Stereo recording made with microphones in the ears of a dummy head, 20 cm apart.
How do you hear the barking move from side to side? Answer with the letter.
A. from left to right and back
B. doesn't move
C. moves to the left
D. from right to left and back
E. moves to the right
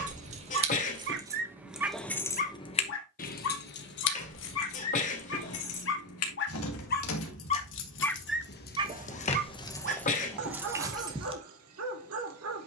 D.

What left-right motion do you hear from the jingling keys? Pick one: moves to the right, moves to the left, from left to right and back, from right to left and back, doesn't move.
from right to left and back.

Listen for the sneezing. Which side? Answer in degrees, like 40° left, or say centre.
30° left.